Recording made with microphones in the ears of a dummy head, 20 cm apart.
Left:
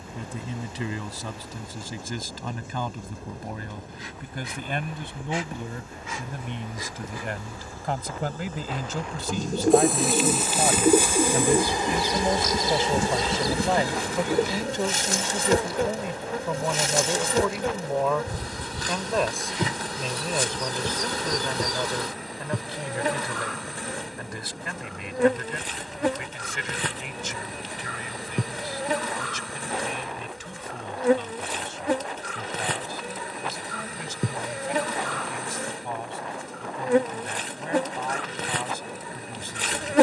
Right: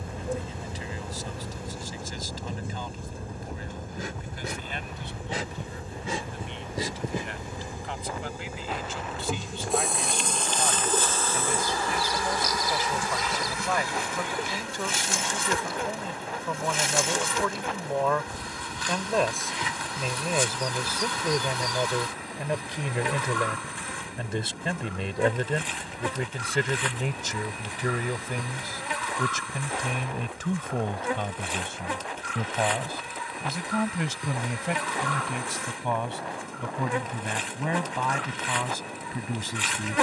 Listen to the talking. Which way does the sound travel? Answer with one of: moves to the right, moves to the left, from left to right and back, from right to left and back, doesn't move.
moves to the right.